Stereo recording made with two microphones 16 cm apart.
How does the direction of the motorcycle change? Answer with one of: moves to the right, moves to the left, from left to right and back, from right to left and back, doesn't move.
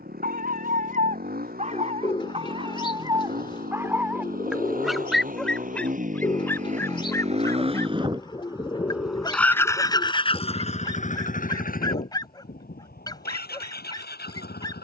moves to the left.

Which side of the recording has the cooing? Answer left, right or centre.
left.